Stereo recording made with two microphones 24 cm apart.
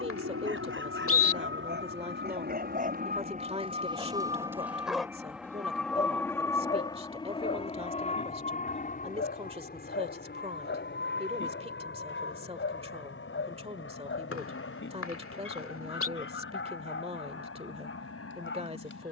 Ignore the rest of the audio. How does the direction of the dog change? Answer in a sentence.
In this clip you hear the dog move to the left.